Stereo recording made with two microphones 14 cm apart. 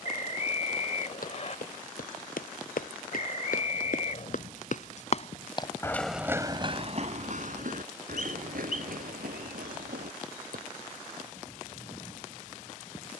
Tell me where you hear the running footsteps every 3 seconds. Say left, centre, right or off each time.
left, left, right, right, off.